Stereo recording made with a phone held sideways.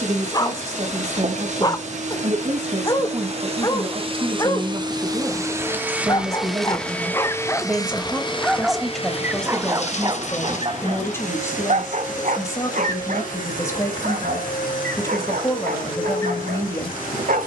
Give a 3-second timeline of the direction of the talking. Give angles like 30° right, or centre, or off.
40° right, 30° right, 10° right, 10° left, 20° left, 20° left.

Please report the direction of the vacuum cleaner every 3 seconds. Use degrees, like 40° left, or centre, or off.
50° right, 30° right, 20° left, 60° left, 70° left, 80° left.